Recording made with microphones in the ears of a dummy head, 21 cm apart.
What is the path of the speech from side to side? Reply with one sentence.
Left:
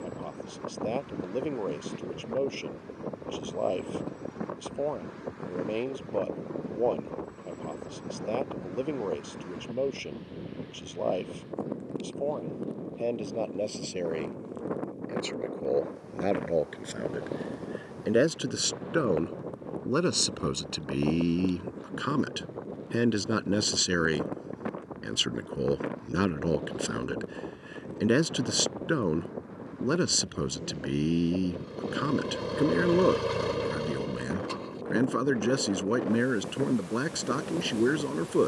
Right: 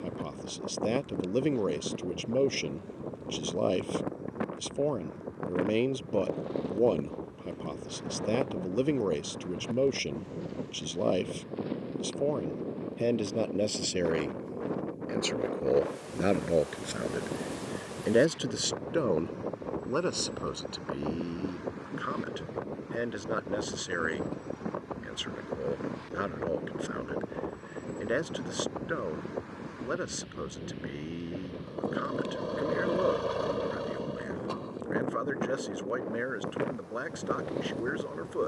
You can hear the speech travel towards the left.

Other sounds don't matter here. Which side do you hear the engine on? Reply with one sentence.
In this clip you hear the engine on the left.